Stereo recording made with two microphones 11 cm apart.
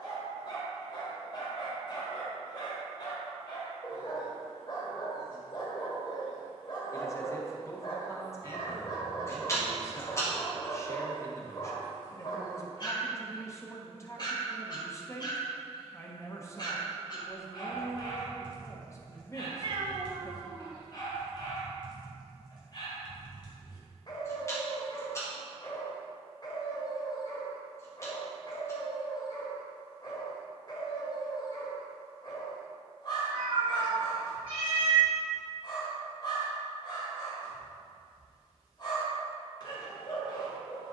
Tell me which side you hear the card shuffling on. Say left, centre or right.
left.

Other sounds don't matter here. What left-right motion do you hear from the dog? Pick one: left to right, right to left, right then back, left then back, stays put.
stays put.